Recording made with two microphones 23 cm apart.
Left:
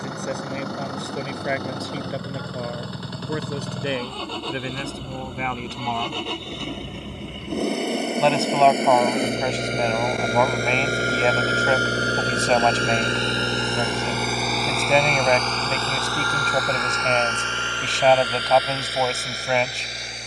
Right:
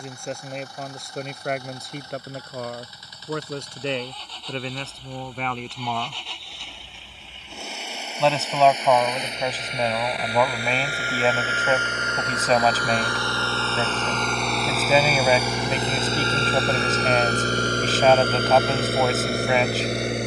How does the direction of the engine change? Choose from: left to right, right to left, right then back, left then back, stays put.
left to right.